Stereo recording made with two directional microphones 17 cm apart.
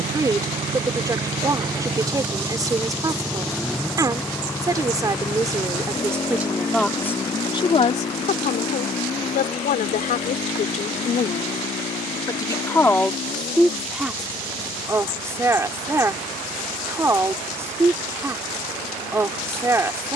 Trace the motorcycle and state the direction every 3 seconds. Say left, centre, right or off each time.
right, centre, left, left, left, left, left.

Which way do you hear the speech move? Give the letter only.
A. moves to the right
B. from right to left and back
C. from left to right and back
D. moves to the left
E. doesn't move
B.